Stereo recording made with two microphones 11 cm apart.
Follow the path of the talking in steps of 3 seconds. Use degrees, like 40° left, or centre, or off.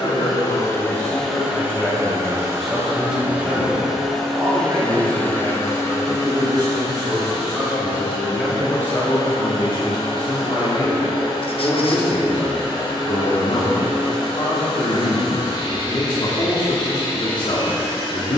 20° left, 20° right, 20° right, 50° left, 50° left, 50° left.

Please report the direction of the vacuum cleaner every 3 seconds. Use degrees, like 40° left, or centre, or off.
centre, 10° left, 40° left, 50° left, 50° left, 50° left.